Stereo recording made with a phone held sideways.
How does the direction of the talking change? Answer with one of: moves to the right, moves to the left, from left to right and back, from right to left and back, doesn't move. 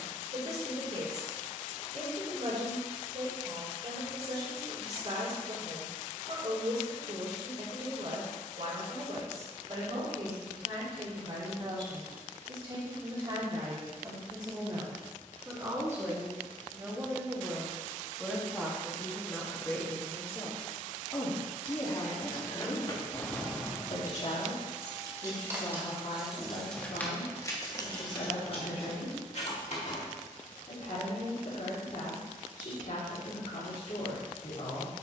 moves to the left.